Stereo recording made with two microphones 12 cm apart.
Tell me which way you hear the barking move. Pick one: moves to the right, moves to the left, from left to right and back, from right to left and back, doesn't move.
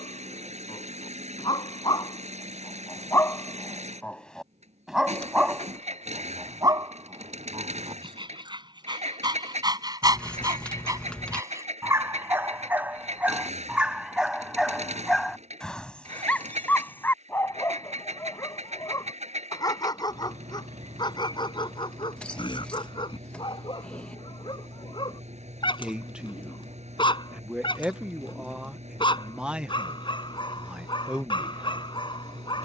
from left to right and back.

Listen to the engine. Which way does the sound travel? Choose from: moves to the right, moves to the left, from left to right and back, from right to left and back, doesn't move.
doesn't move.